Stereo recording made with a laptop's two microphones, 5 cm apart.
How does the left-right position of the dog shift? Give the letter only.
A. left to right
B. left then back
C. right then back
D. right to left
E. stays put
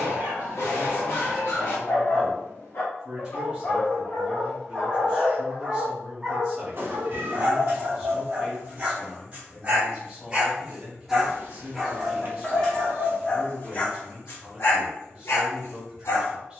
C.